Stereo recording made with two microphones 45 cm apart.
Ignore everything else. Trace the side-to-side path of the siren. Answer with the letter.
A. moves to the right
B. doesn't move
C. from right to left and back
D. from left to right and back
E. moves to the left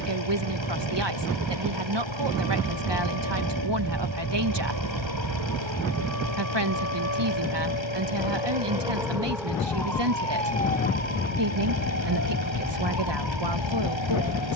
E.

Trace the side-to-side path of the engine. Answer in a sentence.
In this clip you hear the engine stay in one place.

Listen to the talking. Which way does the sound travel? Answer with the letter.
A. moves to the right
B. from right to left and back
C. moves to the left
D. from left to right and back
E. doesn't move
E.